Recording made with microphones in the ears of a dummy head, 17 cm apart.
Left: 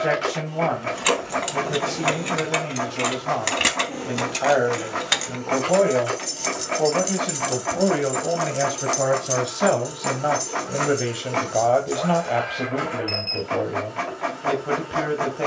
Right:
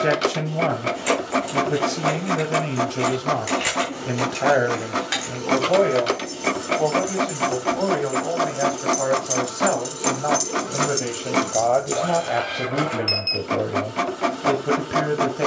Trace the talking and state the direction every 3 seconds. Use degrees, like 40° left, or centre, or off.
30° right, 20° right, 20° left, 20° left, 20° right.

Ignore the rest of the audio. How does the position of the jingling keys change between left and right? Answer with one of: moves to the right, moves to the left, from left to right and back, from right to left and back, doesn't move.
moves to the right.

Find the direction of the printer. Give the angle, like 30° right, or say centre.
50° right.